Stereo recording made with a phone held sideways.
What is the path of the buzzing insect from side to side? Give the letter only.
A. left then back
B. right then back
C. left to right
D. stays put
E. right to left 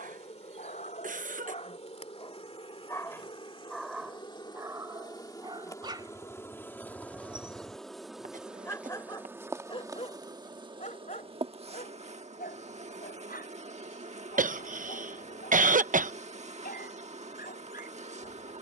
C.